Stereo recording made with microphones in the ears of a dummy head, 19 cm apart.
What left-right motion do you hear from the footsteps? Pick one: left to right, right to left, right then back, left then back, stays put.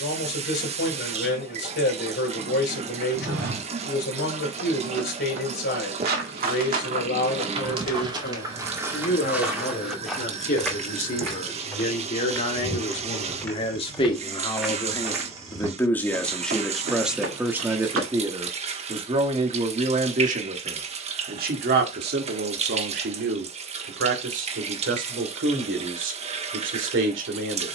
left then back.